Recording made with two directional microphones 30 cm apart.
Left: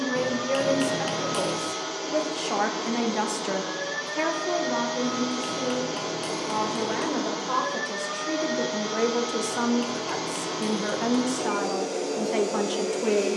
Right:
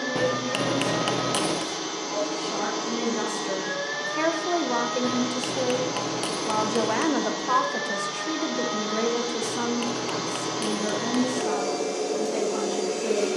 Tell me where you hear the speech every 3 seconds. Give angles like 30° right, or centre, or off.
40° left, 20° right, 20° right, 20° left, 40° left.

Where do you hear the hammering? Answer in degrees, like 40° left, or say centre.
40° right.